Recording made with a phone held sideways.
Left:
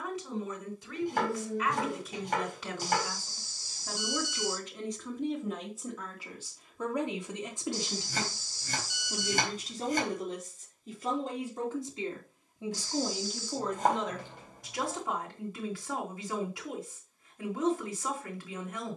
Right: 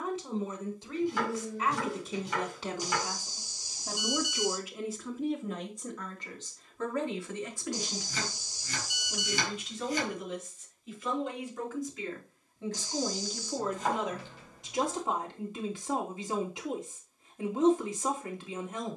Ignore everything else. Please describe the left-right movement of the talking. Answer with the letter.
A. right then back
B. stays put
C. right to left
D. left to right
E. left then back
E.